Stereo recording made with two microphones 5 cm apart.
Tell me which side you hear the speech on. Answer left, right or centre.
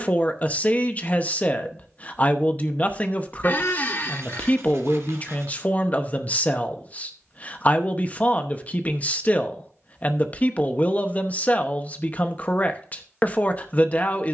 left.